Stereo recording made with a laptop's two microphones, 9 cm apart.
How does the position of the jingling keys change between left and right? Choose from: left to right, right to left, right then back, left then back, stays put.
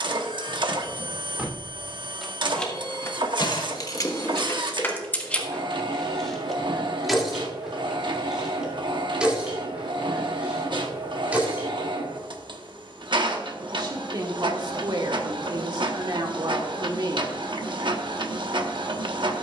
left then back.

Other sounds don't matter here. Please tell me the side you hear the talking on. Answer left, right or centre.
right.